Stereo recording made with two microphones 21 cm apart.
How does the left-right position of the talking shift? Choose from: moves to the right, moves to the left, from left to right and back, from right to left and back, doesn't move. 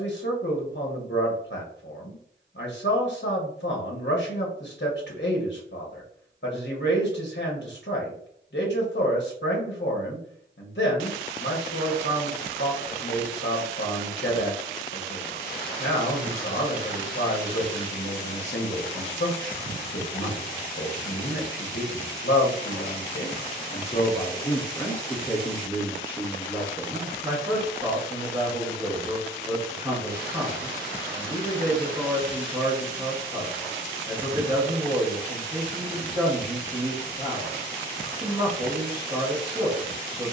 moves to the right.